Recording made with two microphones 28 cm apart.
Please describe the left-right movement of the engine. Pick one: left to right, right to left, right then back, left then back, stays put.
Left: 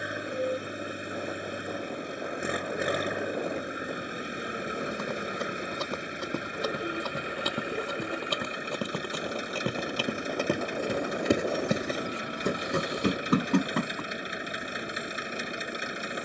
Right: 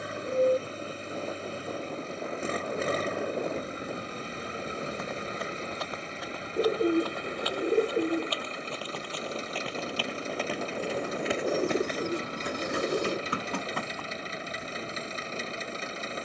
stays put.